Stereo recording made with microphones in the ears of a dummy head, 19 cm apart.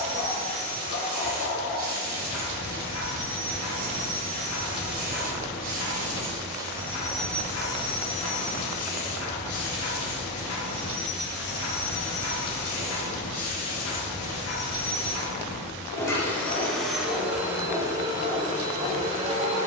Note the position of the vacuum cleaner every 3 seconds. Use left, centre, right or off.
right, right, centre, left, left, centre, right.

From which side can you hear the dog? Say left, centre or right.
left.